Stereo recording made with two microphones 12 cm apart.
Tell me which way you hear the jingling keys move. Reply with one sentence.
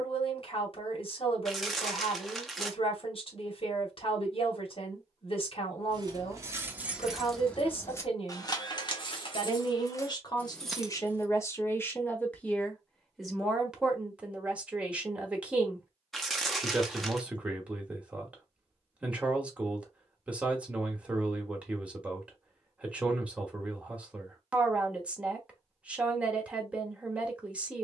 In this clip you hear the jingling keys move from right to left and back again.